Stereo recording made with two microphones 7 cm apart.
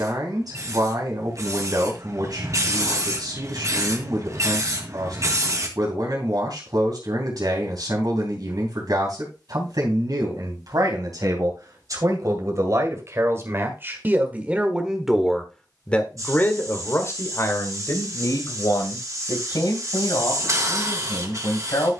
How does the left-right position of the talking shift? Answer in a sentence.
You can hear the talking move from right to left.